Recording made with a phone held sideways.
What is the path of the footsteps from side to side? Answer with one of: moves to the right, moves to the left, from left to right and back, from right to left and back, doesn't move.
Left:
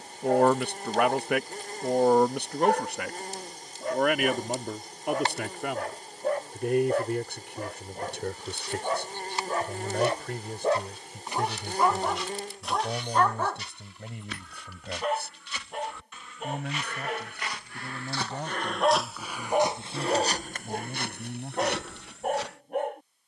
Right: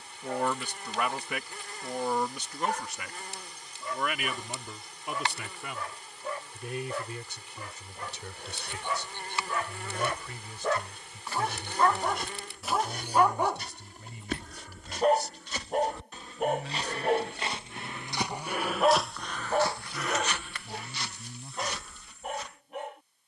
moves to the left.